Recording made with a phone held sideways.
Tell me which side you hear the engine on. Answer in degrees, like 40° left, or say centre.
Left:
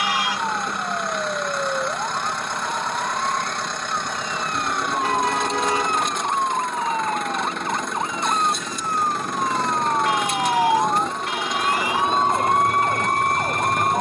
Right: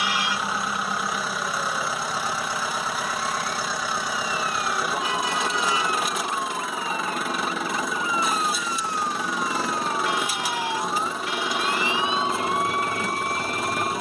centre.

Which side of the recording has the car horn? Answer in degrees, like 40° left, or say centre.
50° left.